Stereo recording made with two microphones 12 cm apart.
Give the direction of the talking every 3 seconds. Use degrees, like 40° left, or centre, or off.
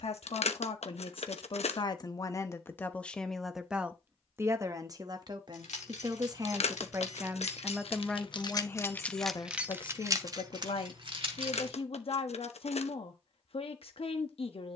40° left, 20° right, 10° right, 50° left, 50° left.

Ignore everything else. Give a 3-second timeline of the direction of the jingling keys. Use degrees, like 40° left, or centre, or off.
off, 80° left, 60° left, 30° right, off.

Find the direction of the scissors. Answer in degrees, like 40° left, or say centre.
70° left.